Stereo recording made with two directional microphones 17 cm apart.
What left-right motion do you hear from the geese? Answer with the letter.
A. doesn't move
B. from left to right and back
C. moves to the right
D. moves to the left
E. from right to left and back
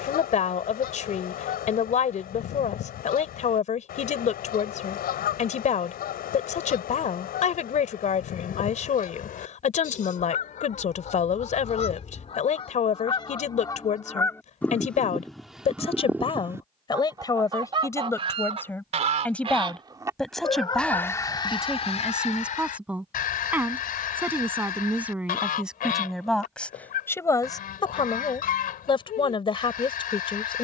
B.